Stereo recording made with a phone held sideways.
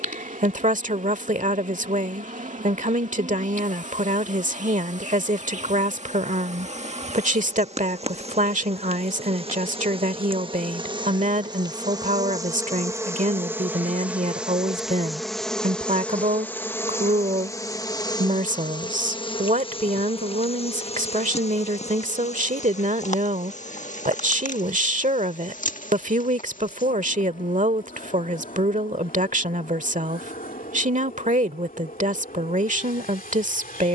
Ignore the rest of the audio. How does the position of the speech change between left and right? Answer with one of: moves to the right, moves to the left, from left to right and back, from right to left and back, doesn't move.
doesn't move.